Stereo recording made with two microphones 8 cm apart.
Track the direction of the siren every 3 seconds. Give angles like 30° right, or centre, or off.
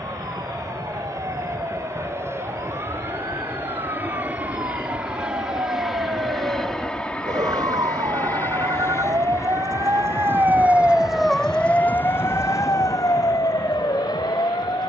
80° right, 80° right, 70° right, 20° right, 50° left.